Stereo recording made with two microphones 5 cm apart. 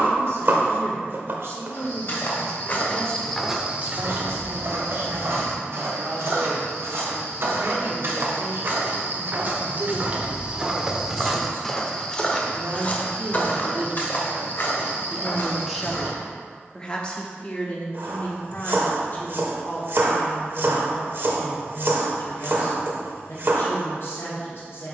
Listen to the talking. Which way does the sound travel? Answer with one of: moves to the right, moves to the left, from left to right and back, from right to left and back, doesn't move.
moves to the left.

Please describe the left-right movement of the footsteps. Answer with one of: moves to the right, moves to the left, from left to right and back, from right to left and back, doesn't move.
from left to right and back.